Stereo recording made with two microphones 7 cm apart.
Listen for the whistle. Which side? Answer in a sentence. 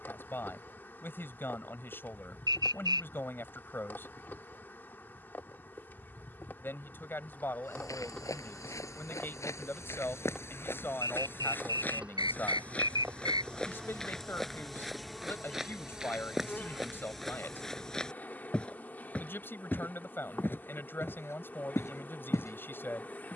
In this clip you hear the whistle on the right.